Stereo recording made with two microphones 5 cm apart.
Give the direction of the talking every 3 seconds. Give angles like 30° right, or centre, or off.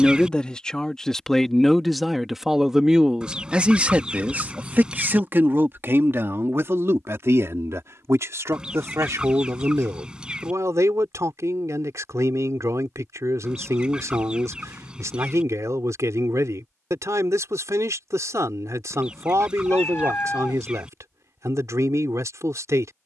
centre, 30° right, 60° right, 70° right, 70° right, 70° right, 70° right, 70° right.